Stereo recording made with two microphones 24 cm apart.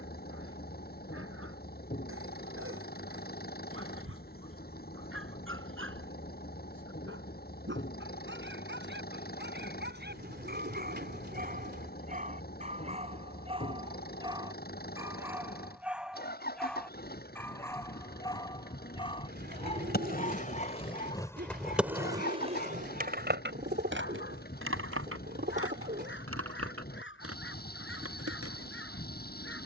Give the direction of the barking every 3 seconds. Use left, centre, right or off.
right, right, right, right, right, centre, left, left, left, left.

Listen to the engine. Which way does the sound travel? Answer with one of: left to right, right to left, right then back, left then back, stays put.
stays put.